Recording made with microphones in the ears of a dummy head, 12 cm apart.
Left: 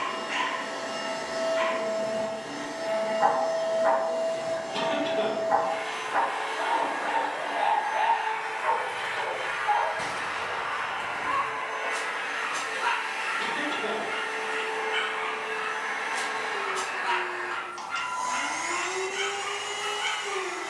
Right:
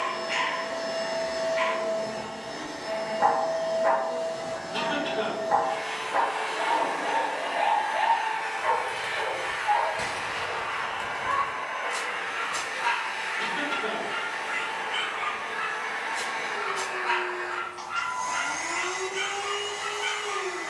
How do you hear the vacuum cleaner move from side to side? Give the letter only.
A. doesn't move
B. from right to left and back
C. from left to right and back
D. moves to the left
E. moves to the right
C.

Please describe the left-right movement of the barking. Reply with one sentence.
You can hear the barking travel towards the left.